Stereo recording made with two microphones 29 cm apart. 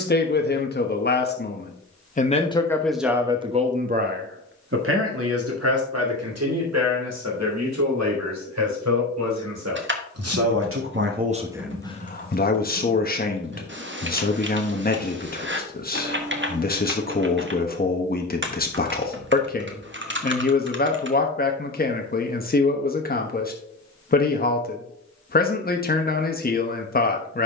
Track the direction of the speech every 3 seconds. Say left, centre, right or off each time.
left, right, right, right, left, left, left, left, left.